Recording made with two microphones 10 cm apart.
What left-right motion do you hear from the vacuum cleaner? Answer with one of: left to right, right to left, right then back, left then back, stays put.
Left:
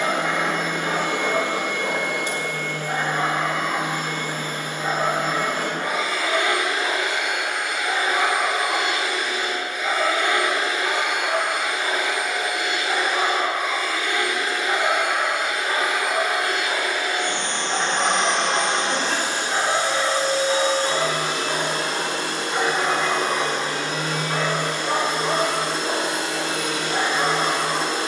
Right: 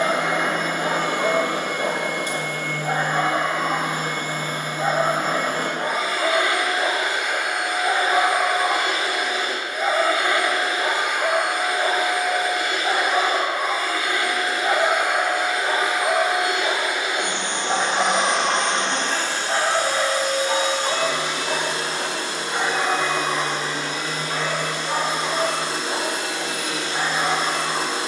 right to left.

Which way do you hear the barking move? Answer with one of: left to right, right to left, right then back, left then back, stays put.
right to left.